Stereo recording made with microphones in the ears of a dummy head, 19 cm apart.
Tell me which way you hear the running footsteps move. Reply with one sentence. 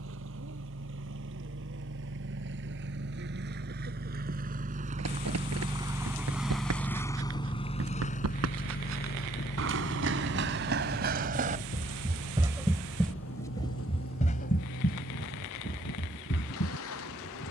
You can hear the running footsteps move to the left.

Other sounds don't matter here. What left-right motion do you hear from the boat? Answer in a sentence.
You can hear the boat go from the right side to the left.